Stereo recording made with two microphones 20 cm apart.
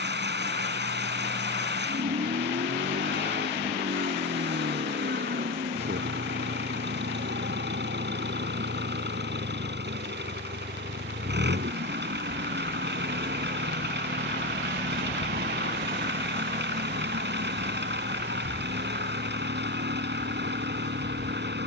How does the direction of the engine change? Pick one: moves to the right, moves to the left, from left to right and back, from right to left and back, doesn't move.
doesn't move.